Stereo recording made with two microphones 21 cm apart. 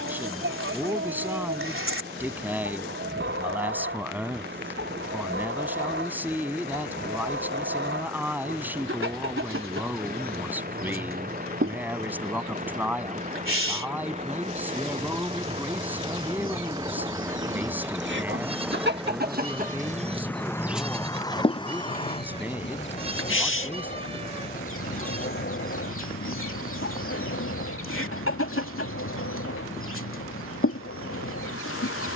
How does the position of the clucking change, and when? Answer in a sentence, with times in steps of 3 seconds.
You can hear the clucking on the right from 0 s and on the left from 21 s.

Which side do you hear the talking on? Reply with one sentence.
In this clip you hear the talking in the centre.